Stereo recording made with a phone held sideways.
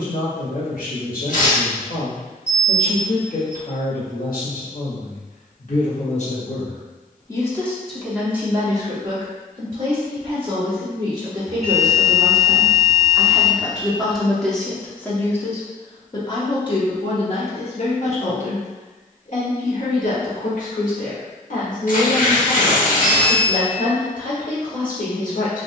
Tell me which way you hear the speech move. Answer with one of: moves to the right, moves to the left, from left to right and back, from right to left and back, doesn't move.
from left to right and back.